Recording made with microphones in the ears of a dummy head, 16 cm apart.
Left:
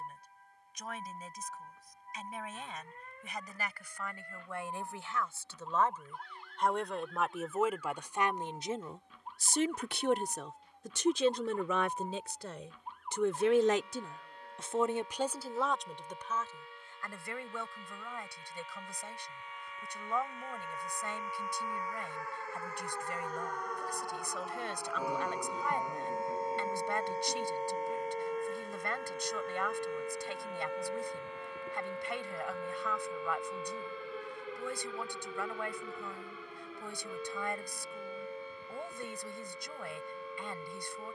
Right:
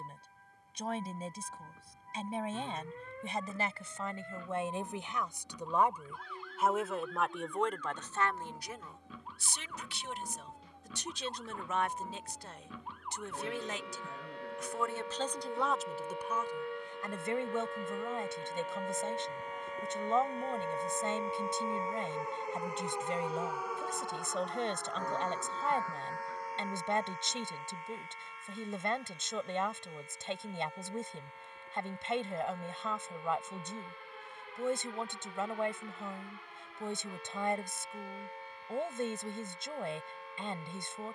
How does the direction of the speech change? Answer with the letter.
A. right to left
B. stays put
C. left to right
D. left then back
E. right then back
D.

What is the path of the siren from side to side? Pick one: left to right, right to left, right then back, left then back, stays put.
right to left.